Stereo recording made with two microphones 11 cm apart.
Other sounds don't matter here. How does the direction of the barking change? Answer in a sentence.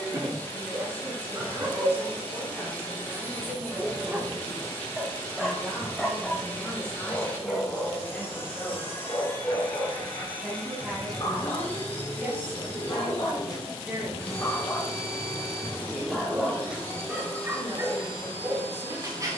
In this clip you hear the barking move from right to left and back again.